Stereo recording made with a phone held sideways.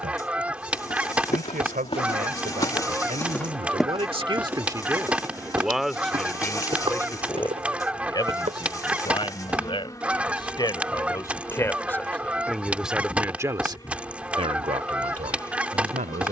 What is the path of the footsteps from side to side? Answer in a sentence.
You can hear the footsteps travel towards the right.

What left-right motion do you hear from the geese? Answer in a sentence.
You can hear the geese stay put.